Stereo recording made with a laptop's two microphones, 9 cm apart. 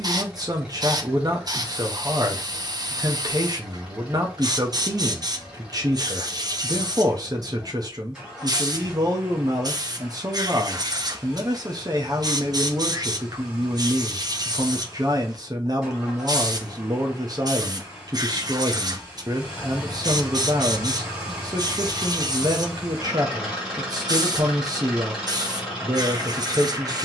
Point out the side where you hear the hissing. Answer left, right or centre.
right.